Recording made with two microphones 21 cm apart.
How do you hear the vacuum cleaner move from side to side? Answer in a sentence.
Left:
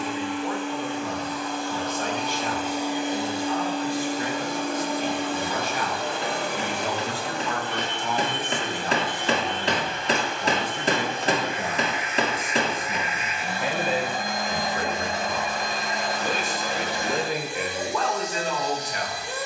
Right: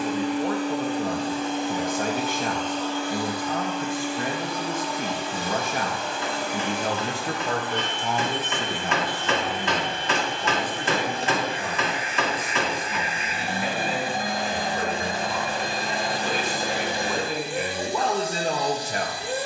You can hear the vacuum cleaner go left and come back.